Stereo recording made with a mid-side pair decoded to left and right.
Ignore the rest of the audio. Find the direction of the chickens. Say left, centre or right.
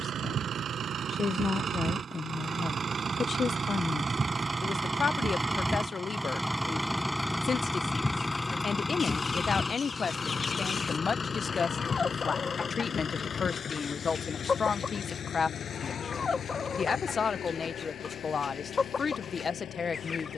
left.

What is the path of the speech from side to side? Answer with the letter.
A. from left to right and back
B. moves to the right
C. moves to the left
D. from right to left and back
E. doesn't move
E.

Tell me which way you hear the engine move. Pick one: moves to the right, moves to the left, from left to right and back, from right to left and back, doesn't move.
moves to the left.